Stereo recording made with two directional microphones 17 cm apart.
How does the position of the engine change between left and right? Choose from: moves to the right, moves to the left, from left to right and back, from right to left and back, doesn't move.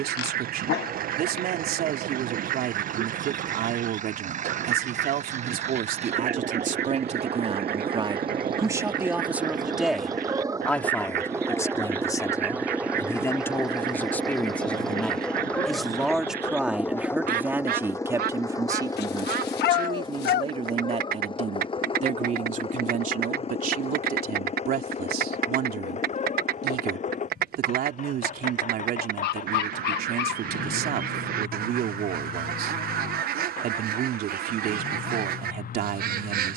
moves to the left.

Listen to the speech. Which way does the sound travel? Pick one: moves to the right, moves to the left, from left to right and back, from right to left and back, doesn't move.
from right to left and back.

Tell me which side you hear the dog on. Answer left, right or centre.
left.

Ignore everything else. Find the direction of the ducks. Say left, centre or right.
right.